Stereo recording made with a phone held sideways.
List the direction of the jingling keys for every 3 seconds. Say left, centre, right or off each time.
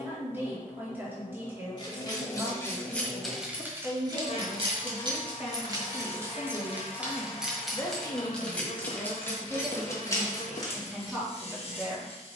left, right, centre, left.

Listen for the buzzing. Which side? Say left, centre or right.
left.